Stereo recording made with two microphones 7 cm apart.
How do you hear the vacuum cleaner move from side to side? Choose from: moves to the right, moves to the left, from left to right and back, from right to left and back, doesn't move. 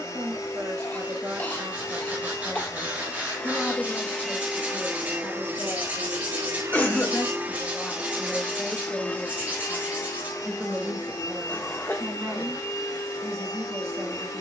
from left to right and back.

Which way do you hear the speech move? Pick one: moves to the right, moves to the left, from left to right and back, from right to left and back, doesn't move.
from right to left and back.